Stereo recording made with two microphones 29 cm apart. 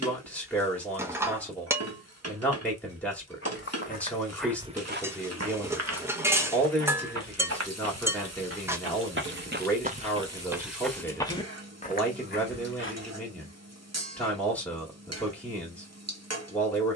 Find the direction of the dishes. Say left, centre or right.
centre.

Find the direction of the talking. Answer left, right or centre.
centre.